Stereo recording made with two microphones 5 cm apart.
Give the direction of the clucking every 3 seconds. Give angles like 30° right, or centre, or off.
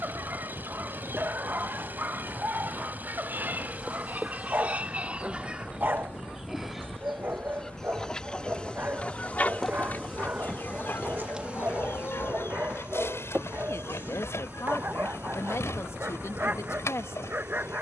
50° right, 30° right, 10° left, 40° left, 60° left, 70° left.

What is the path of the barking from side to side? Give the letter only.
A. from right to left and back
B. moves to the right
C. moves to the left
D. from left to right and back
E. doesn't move
E.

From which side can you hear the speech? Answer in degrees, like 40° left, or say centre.
60° left.